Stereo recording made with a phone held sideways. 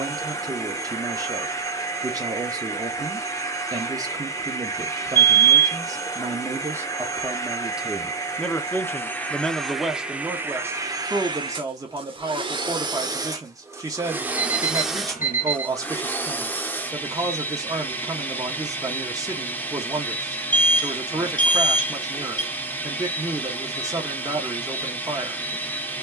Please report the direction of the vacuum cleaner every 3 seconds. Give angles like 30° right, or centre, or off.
20° left, 20° left, 20° left, 10° right, 20° right, 10° left, 10° left, 10° left, 10° left.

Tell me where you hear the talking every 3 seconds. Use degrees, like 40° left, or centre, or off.
30° right, 30° right, 10° right, 10° right, 30° right, 30° right, 30° right, 30° right, 30° right.